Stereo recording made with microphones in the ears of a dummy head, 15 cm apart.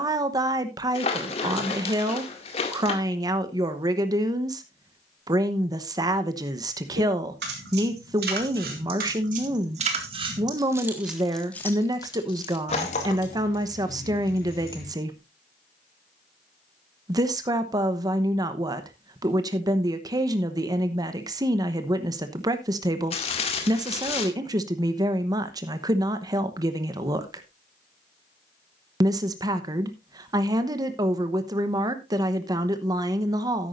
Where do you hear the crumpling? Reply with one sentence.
In this clip you hear the crumpling on the left.